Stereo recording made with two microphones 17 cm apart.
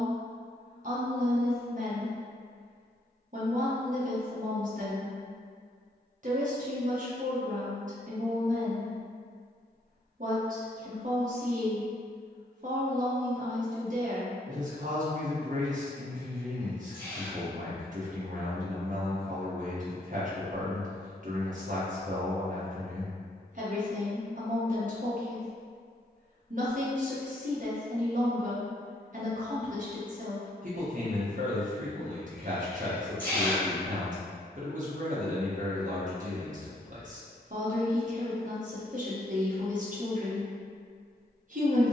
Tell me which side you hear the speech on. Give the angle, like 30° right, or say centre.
50° right.